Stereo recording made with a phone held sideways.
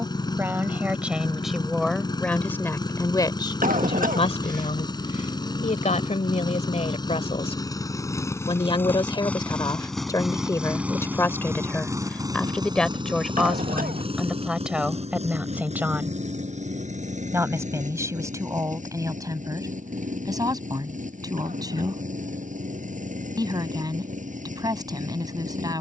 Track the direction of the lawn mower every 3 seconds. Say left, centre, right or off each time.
left, left, left, centre, right, right, right, right, right.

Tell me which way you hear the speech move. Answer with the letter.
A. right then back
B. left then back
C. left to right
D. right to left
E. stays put
B.